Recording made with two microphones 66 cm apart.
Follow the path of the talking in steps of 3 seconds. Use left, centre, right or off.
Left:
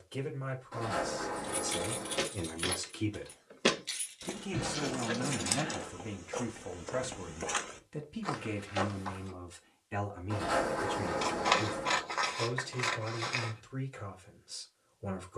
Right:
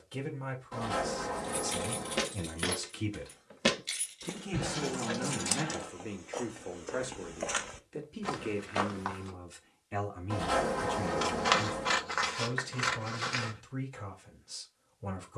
right, centre, left, centre, right.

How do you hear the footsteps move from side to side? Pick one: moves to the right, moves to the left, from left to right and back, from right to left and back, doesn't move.
from right to left and back.